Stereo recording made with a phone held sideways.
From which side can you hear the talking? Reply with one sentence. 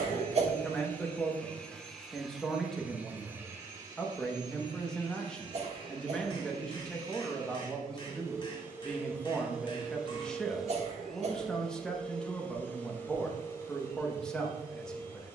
You can hear the talking in the centre.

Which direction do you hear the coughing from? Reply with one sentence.
In this clip you hear the coughing on the right.